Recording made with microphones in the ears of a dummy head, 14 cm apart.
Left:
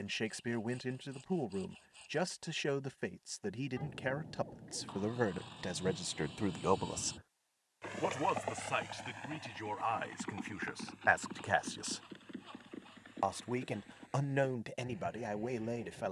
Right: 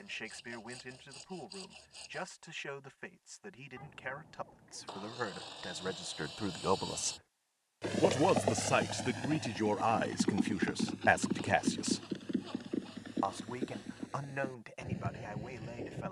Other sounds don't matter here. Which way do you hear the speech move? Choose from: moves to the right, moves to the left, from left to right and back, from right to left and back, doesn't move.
from left to right and back.